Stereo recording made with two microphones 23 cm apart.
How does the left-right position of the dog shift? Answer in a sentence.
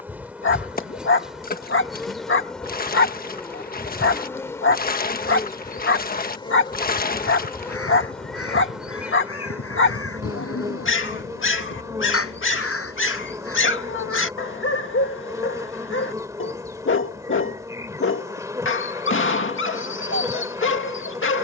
You can hear the dog stay in one place.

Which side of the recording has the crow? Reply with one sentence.
You can hear the crow on the left.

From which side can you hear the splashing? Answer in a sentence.
In this clip you hear the splashing on the left.